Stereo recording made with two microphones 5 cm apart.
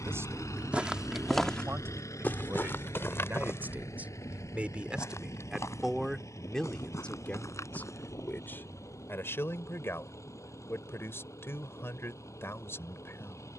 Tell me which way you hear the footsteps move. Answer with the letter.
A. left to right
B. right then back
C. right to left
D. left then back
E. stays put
C.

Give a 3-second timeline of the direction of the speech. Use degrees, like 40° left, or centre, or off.
50° right, 20° right, 20° left, 50° left, 50° left.